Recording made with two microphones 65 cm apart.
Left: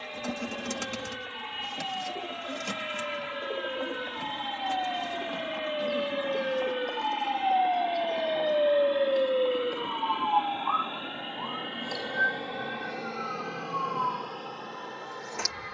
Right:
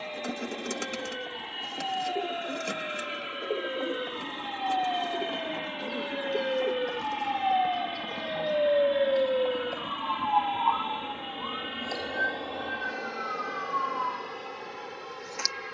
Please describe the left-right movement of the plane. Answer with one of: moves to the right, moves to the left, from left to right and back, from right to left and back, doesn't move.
moves to the right.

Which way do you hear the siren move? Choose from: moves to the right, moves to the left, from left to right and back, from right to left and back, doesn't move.
moves to the left.